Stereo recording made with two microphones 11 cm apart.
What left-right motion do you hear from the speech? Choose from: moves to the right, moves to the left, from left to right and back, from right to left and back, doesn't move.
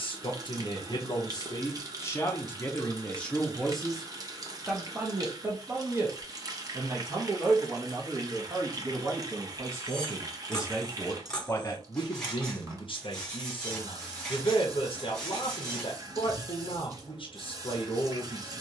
from left to right and back.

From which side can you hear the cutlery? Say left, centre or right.
centre.